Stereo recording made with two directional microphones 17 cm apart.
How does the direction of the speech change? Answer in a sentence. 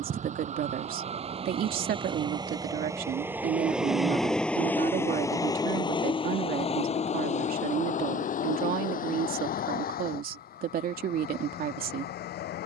In this clip you hear the speech stay put.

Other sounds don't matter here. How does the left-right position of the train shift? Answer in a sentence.
In this clip you hear the train move from right to left.